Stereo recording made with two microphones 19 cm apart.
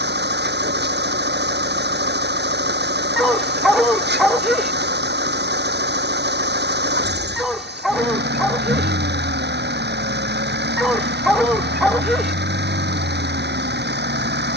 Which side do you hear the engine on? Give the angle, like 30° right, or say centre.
60° right.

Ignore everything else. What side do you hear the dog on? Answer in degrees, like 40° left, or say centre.
centre.